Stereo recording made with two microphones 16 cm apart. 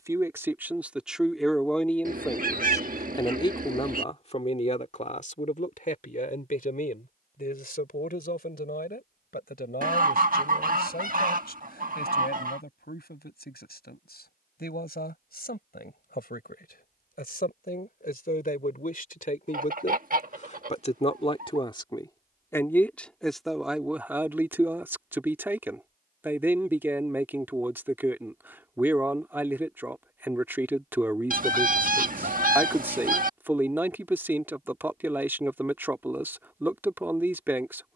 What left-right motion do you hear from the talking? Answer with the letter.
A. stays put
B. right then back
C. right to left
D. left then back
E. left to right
D.